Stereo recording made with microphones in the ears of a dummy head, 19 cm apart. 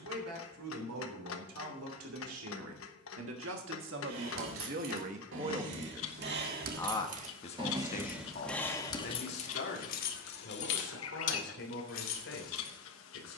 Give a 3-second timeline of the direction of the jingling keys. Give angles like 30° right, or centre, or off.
off, 60° right, 20° right, 50° left, 70° left.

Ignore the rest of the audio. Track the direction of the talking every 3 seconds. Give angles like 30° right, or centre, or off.
80° right, 50° right, 30° left, 60° left, 60° left.